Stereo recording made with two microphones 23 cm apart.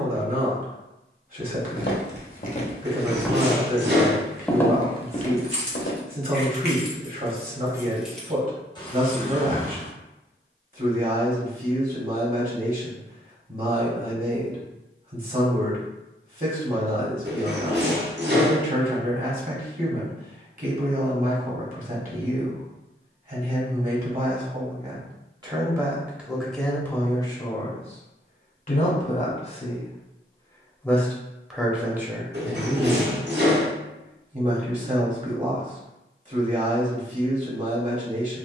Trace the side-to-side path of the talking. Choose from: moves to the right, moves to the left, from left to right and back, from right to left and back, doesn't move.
from right to left and back.